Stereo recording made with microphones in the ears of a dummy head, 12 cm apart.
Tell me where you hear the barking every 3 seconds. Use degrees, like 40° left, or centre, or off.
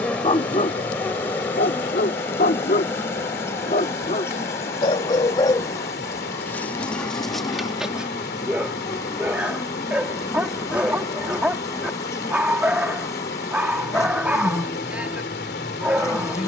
50° left, 40° left, centre, 10° right, 10° right, 10° right.